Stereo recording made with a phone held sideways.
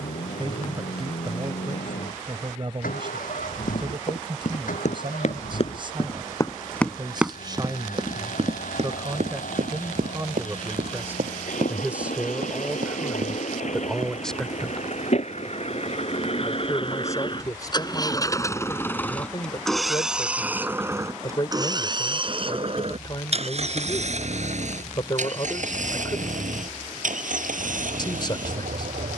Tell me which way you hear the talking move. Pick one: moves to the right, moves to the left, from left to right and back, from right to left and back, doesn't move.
moves to the left.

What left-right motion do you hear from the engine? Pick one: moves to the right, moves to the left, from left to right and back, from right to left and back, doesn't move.
moves to the right.